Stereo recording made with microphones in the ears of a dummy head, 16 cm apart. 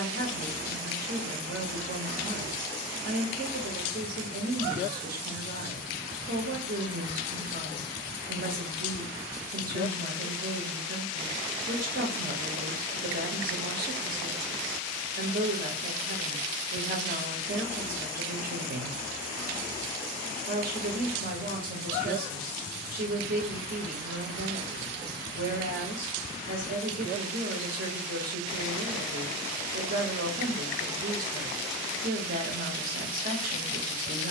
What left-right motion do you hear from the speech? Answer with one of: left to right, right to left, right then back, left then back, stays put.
stays put.